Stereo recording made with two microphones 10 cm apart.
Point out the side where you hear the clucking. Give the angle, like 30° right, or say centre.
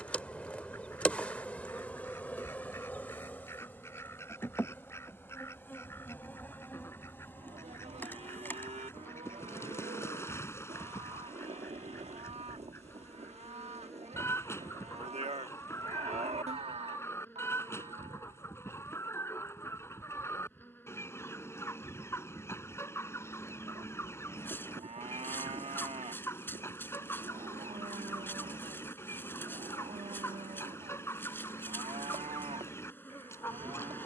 30° left.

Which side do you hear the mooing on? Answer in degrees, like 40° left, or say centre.
80° right.